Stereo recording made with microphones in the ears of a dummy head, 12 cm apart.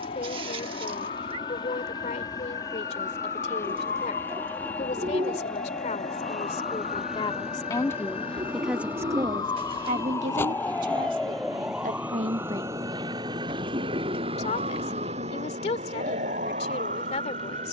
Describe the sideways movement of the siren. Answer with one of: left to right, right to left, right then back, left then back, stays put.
left to right.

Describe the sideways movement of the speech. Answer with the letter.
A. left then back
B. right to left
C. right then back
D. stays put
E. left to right
C.